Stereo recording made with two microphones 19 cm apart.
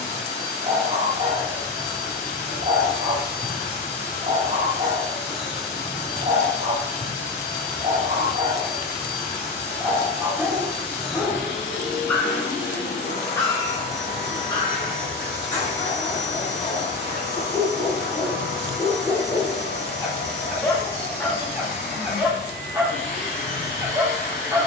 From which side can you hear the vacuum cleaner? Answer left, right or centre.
left.